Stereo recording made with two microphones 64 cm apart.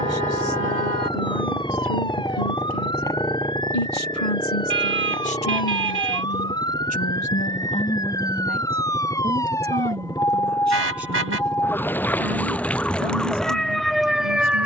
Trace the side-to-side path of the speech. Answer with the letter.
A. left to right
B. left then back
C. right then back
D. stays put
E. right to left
A.